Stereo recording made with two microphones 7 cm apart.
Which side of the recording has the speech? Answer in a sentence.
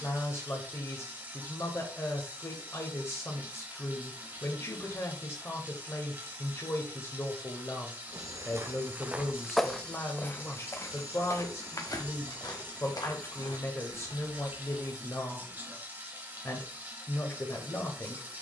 You can hear the speech on the left.